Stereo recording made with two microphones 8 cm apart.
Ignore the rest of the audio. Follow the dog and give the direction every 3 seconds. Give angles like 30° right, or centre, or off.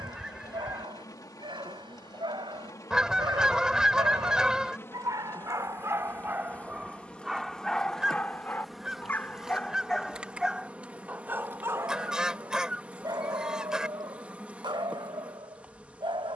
70° right, 50° right, centre, 10° right, 50° right, 70° right.